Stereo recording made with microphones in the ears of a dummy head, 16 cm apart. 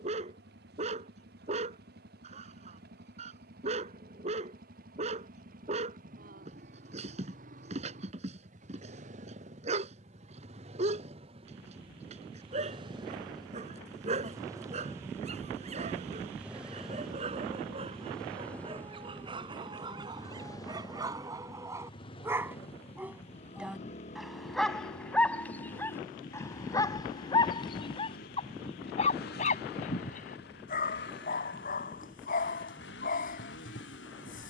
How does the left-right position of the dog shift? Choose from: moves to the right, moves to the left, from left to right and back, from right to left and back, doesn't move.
moves to the left.